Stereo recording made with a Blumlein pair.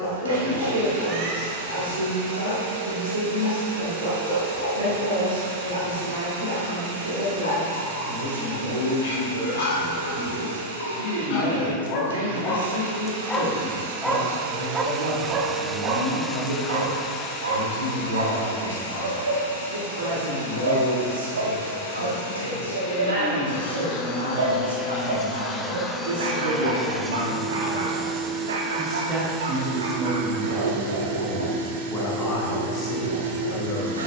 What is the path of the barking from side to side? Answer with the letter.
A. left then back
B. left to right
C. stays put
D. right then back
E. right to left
B.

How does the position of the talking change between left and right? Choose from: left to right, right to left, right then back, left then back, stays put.
right to left.